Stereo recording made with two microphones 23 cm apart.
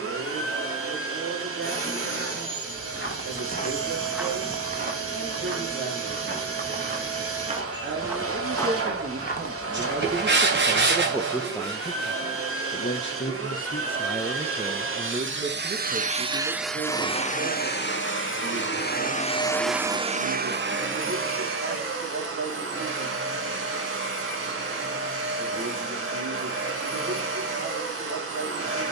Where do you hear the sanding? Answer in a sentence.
In this clip you hear the sanding on the right.